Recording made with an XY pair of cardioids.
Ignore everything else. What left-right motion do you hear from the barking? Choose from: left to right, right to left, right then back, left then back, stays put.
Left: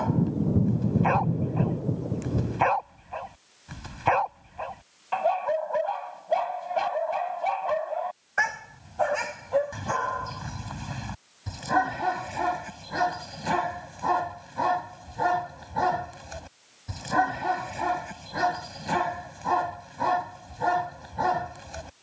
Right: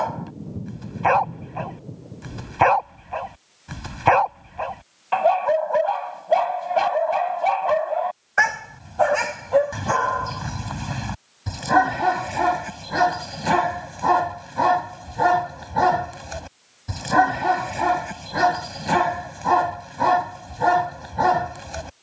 stays put.